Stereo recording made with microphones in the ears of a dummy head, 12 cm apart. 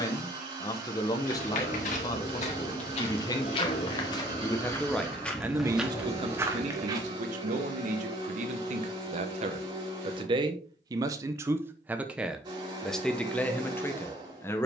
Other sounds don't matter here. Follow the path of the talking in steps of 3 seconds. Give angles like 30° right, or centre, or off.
30° left, 10° left, 50° right, 30° right, 10° left.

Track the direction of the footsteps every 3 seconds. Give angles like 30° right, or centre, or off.
60° left, 20° left, 20° right, off, off.